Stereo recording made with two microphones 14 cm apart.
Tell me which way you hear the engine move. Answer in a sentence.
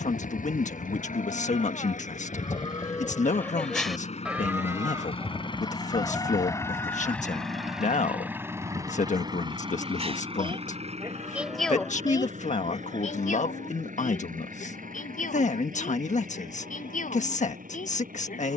In this clip you hear the engine move to the right.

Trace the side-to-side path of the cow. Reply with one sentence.
In this clip you hear the cow go right and come back.